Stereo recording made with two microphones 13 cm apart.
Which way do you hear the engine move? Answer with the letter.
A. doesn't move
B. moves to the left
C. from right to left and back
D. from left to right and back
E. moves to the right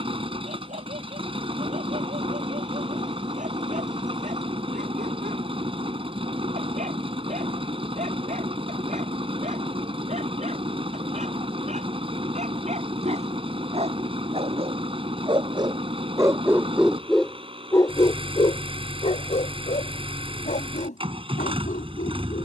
A.